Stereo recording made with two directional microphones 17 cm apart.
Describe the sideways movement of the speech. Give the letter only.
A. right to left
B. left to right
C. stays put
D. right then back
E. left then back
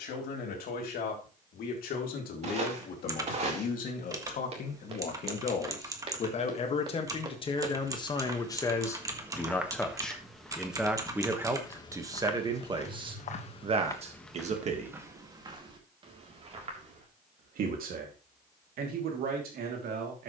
B.